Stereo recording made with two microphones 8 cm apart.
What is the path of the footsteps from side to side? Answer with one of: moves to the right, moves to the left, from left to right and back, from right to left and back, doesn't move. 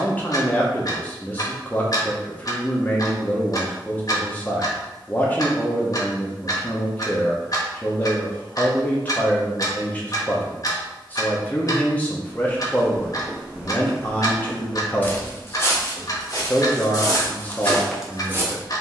from right to left and back.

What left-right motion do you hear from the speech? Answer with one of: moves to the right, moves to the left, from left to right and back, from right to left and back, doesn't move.
doesn't move.